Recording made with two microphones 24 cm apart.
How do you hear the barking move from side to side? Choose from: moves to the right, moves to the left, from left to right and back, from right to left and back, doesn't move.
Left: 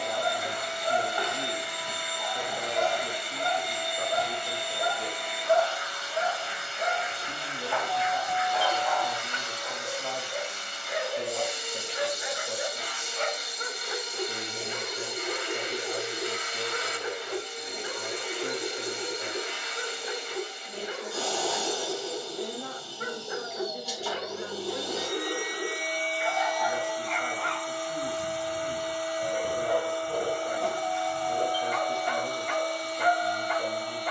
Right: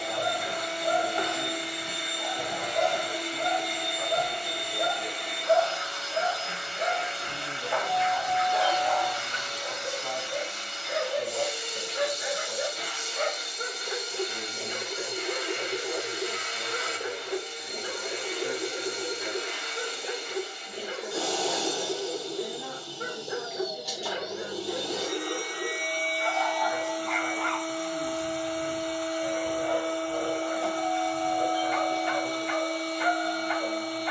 moves to the left.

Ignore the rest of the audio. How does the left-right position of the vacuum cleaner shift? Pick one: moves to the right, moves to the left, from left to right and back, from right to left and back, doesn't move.
doesn't move.